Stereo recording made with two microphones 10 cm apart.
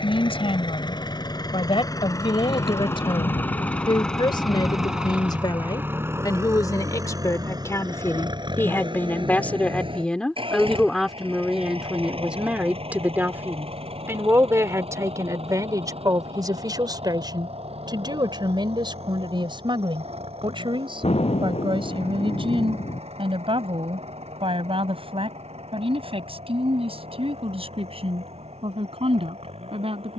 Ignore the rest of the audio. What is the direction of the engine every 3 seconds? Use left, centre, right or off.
left, centre, right, right, right, right, right, right, right, right.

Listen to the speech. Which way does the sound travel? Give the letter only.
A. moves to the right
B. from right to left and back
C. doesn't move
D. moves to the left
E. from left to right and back
A.